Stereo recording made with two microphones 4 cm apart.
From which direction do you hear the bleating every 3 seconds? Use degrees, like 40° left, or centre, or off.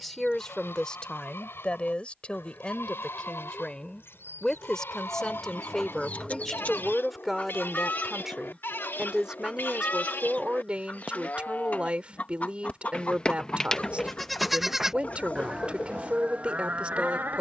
80° left, 70° left, 70° left, 50° left, 10° left, 40° right.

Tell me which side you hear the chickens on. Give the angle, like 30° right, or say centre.
40° left.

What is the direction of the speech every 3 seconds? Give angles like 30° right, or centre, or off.
20° left, 20° left, centre, 30° right, 30° right, 30° right.